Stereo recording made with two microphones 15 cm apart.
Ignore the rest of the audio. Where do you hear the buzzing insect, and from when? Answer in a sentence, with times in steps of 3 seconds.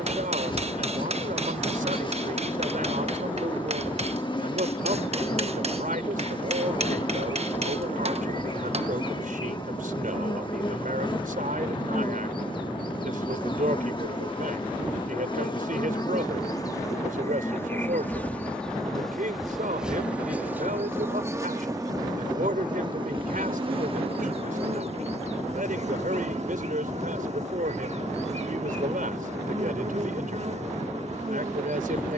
You can hear the buzzing insect on the left from 0 s, in the centre from 18 s and on the right from 21 s.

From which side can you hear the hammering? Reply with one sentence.
You can hear the hammering on the right.